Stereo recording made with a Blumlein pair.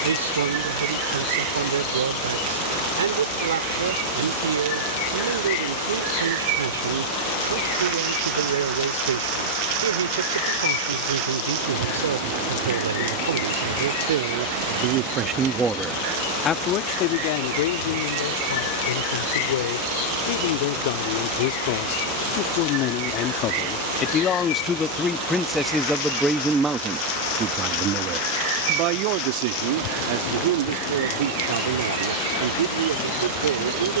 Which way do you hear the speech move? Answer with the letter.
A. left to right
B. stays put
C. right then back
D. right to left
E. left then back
E.